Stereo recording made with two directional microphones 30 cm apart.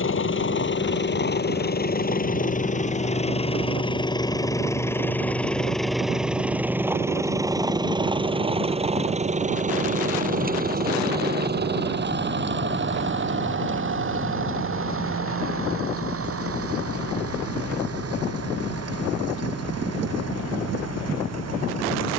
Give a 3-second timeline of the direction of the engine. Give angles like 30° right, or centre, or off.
30° left, 10° left, 10° right, 30° right, 40° right, 50° right, 50° right, 60° right.